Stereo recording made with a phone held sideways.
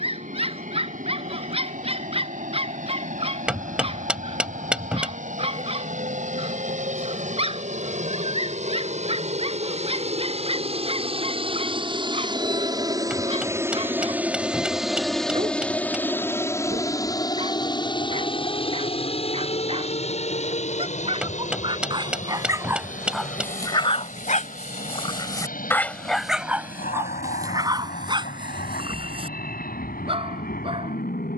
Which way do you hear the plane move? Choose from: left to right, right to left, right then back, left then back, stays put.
right to left.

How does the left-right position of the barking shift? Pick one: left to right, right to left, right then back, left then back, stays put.
left then back.